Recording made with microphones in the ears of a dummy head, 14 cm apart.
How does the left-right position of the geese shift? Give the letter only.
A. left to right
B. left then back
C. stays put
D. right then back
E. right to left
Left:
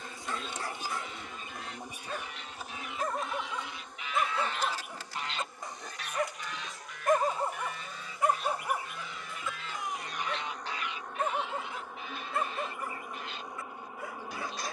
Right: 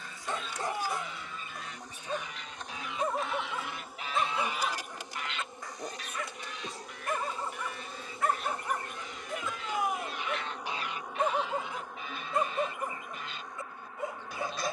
B.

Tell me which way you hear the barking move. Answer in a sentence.
In this clip you hear the barking go left and come back.